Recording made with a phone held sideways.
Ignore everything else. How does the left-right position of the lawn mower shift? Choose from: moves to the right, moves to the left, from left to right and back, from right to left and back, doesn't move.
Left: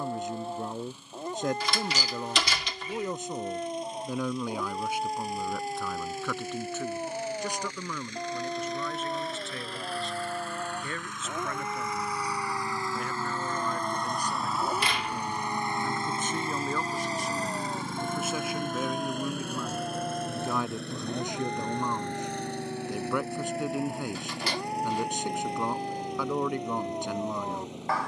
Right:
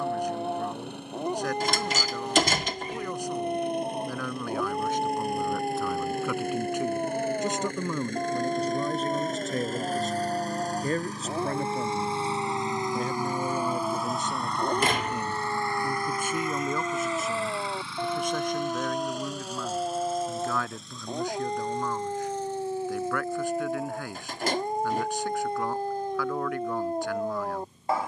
moves to the left.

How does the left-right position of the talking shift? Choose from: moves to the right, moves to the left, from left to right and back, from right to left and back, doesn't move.
from left to right and back.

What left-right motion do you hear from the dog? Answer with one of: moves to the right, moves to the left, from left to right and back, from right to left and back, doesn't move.
doesn't move.